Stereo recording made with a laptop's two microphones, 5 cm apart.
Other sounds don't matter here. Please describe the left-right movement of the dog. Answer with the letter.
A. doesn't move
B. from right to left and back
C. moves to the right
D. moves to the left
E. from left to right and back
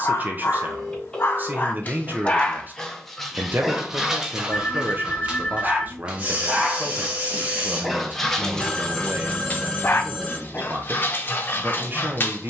E.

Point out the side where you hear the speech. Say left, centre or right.
right.